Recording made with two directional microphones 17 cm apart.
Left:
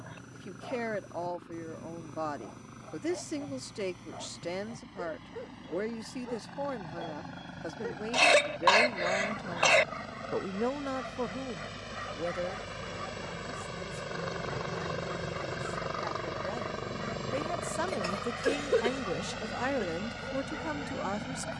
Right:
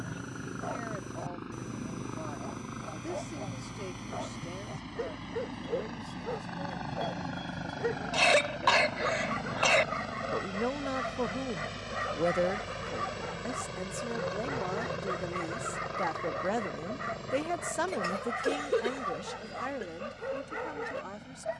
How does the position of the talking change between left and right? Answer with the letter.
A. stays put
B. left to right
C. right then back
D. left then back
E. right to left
C.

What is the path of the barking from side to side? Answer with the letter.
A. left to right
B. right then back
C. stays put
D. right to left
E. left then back
C.